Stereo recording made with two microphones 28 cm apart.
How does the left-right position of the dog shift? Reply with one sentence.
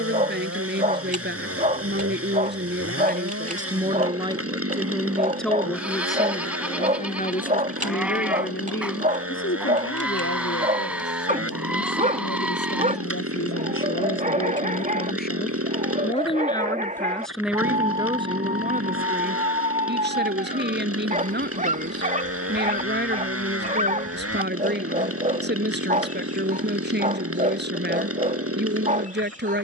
You can hear the dog stay put.